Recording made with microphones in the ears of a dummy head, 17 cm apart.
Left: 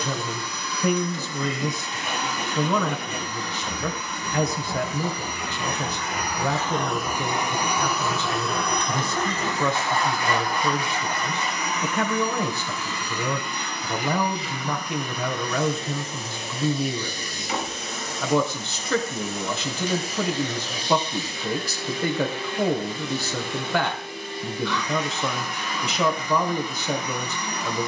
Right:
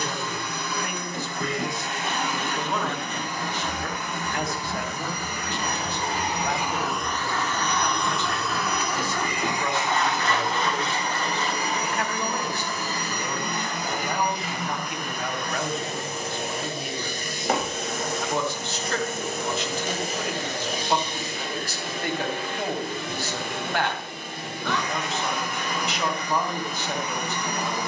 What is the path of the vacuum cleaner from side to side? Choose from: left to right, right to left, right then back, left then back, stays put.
left then back.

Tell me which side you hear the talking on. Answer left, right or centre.
left.